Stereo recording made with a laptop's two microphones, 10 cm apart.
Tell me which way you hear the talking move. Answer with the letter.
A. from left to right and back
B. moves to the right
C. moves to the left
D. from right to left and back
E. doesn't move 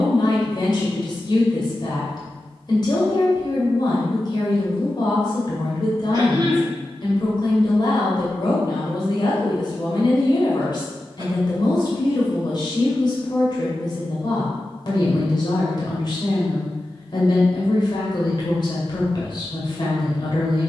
E.